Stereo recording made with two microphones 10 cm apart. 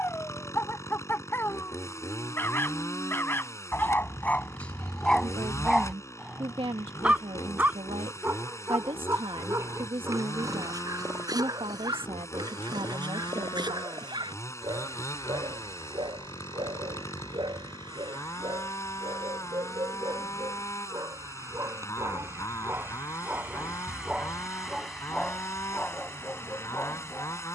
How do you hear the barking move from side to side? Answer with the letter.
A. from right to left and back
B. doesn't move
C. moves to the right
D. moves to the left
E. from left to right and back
E.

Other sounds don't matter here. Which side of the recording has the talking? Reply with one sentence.
In this clip you hear the talking on the right.